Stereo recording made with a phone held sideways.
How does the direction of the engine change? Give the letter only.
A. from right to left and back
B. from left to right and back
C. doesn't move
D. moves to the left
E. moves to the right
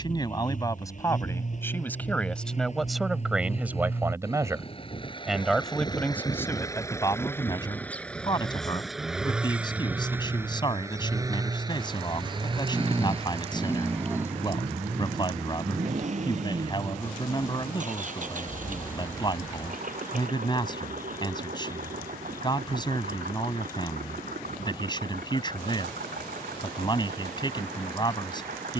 E.